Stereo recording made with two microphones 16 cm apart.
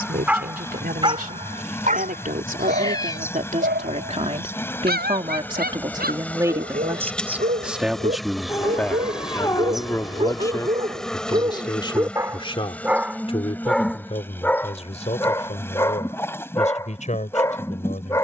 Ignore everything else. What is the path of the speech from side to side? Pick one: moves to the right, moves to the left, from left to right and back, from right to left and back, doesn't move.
moves to the left.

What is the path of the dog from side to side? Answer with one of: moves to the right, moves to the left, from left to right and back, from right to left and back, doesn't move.
from left to right and back.